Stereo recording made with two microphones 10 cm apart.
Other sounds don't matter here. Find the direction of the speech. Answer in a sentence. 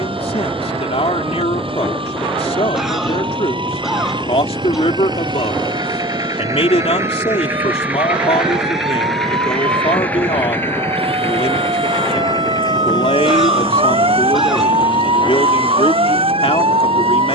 You can hear the speech on the left.